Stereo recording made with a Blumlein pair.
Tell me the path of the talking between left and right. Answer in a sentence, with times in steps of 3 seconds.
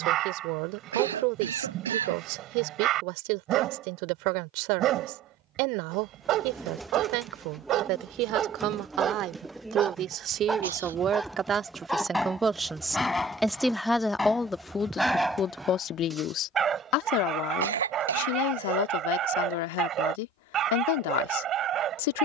You can hear the talking on the right from 0 s, in the centre from 12 s and on the left from 15 s.